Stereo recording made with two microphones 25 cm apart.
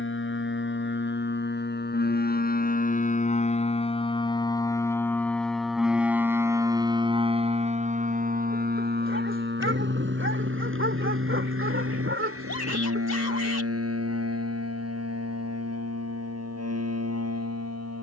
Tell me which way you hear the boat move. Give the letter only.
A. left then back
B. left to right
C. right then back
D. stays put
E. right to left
B.